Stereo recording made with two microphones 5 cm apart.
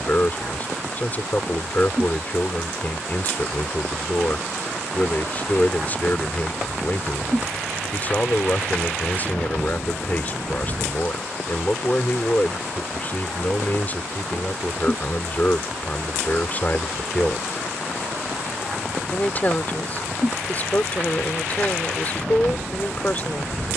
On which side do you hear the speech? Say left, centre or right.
left.